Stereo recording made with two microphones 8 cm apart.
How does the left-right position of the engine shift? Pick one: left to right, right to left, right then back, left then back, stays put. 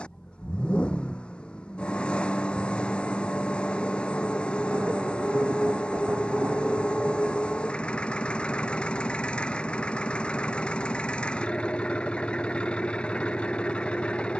stays put.